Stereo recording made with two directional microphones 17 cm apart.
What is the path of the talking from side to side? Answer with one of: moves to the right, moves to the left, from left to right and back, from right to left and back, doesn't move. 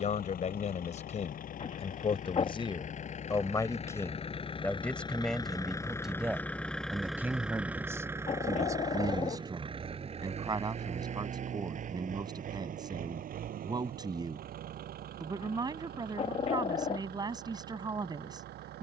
moves to the right.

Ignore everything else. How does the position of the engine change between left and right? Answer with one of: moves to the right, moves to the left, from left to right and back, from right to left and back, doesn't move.
moves to the right.